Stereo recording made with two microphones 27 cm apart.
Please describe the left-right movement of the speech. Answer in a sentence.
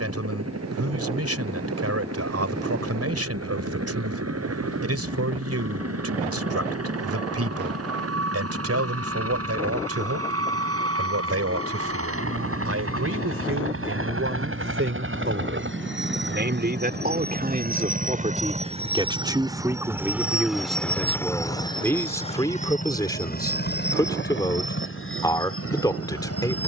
In this clip you hear the speech travel towards the left.